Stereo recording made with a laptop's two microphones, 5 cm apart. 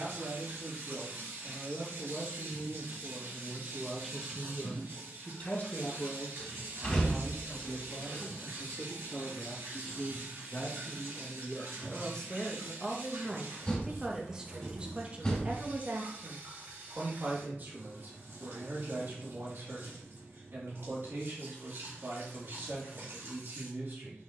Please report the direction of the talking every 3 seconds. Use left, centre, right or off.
right, centre, left, left, centre, right, right, right.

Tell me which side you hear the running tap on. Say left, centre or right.
right.